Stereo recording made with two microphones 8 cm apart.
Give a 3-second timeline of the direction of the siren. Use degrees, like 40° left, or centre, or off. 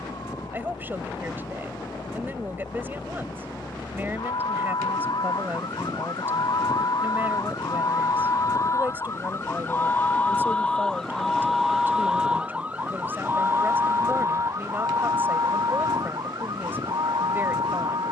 70° left, 60° left, 50° left, 10° left, 30° right, 50° right.